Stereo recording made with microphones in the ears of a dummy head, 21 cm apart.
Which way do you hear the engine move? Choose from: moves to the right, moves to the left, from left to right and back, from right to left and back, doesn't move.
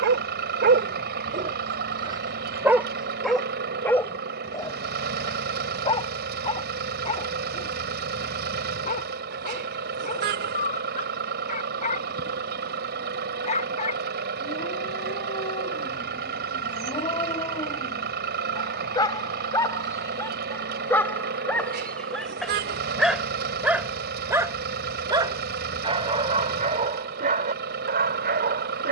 doesn't move.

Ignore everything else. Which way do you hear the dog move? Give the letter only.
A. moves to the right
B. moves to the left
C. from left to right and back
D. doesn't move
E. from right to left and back
E.